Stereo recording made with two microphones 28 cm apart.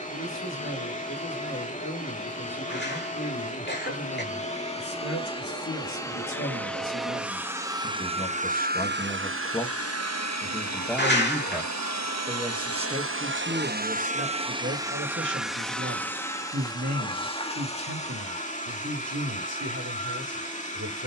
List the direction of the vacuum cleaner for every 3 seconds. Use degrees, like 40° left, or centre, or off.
30° left, 20° left, 10° right, 60° right, 40° right, 10° left, 30° left.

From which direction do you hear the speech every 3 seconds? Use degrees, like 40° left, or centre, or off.
70° left, 60° left, 40° left, 10° left, 30° right, 50° right, 60° right.